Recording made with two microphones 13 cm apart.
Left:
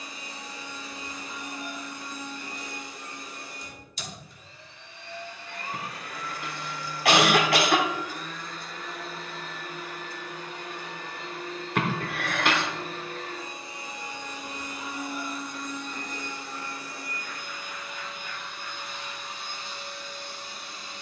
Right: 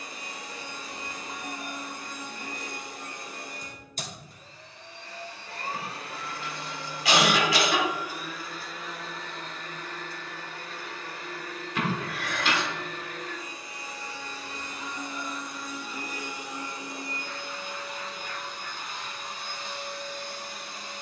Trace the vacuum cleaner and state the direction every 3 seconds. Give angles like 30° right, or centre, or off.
60° right, 40° right, 20° right, 20° left, 20° left, 20° right, 50° right.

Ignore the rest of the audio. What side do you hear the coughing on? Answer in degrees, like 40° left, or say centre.
60° left.